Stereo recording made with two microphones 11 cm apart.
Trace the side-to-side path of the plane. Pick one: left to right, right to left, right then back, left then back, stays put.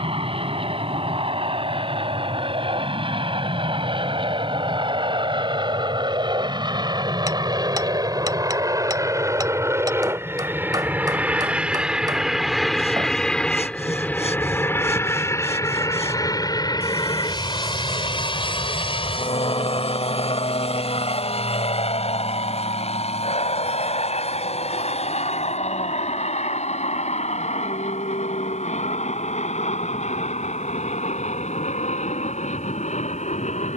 right to left.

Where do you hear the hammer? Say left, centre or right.
right.